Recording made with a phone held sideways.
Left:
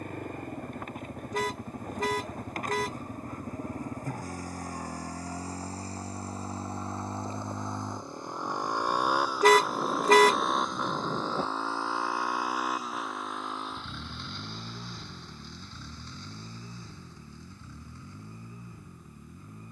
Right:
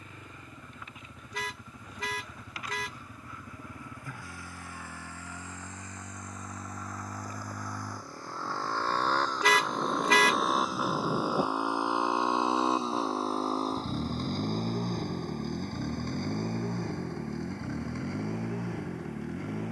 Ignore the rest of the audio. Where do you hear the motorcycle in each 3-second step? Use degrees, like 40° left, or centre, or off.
50° left, 40° left, 20° left, centre, 30° right, 60° right, 70° right.